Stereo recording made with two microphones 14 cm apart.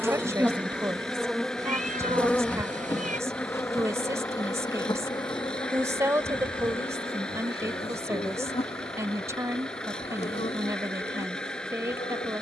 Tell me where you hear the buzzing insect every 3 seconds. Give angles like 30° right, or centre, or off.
centre, 30° left, 40° left, 50° left.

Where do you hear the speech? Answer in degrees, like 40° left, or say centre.
20° right.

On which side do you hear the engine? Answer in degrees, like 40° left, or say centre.
10° left.